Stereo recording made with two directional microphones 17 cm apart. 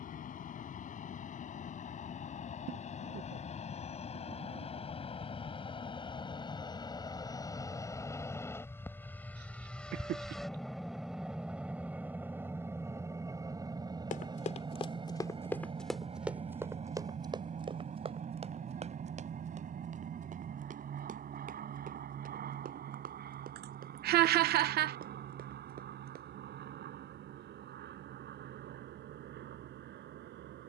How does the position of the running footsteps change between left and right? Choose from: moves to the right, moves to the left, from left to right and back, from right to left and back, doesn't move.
moves to the right.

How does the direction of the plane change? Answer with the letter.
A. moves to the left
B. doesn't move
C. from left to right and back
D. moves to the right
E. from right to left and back
D.